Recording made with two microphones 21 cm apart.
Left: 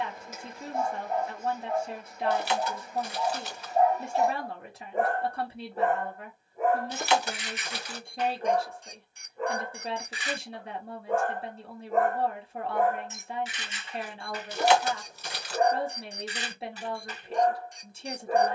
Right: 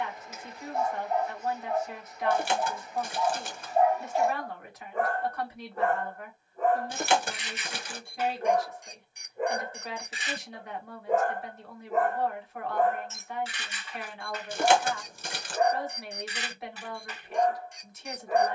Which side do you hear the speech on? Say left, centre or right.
left.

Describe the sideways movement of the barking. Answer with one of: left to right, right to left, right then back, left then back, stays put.
right then back.